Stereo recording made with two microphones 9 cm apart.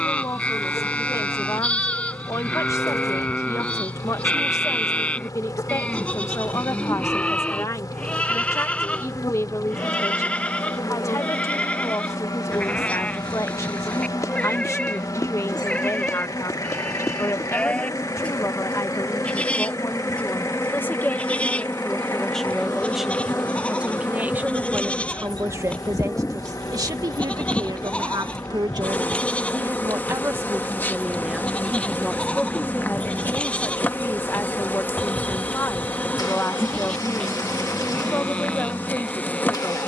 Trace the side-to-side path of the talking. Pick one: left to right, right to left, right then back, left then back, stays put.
right then back.